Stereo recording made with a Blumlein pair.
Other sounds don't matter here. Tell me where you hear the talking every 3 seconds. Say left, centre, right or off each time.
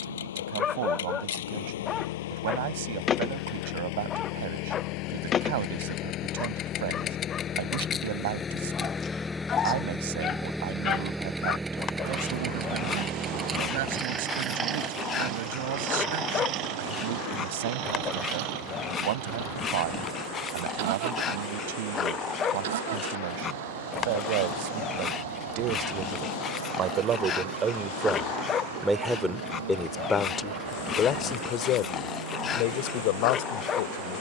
right, right, right, right, right, right, right, right, right, centre, left, left.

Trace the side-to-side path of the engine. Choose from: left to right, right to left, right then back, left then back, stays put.
left to right.